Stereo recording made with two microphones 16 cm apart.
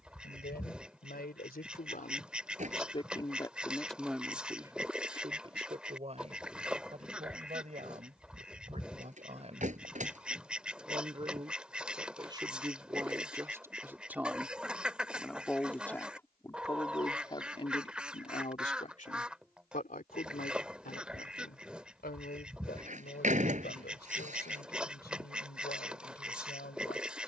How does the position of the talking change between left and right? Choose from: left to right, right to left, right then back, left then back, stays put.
right then back.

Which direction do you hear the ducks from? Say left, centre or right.
centre.